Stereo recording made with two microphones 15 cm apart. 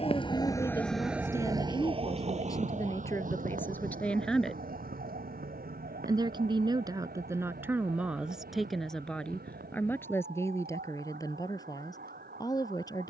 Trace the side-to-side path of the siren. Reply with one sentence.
You can hear the siren move to the right.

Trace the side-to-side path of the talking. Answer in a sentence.
You can hear the talking go right and come back.